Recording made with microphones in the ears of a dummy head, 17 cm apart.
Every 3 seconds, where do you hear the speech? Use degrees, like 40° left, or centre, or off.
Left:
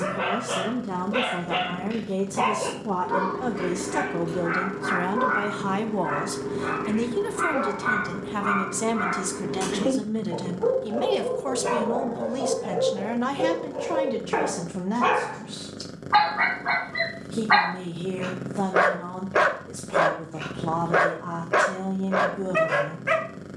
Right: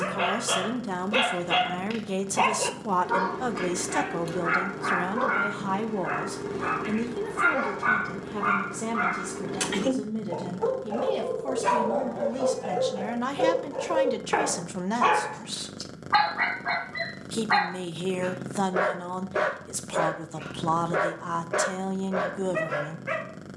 60° right, 20° right, 30° left, 30° left, 10° right, 60° right, 60° right, 60° right.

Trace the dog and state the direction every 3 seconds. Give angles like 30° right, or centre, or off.
70° right, 70° right, 70° right, 60° right, 40° right, centre, 30° left, 30° left.